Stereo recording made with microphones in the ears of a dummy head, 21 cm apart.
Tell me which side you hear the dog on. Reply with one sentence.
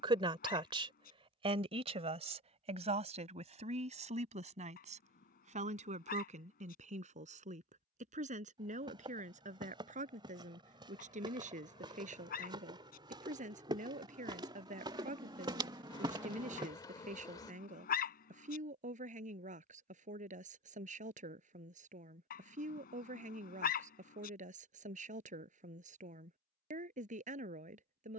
You can hear the dog on the left.